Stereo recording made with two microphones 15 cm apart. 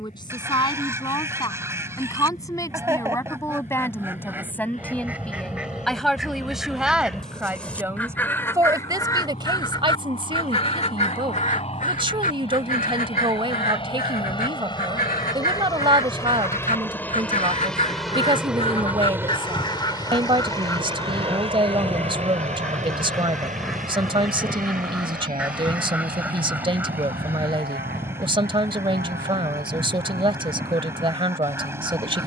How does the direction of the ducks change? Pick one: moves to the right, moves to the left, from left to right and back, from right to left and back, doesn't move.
from right to left and back.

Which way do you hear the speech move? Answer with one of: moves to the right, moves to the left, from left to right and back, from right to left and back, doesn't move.
moves to the right.